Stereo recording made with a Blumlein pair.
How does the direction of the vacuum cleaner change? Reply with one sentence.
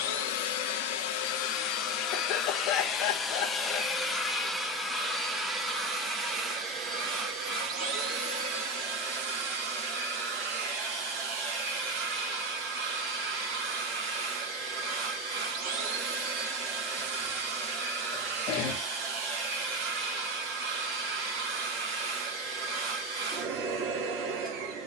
You can hear the vacuum cleaner move to the right.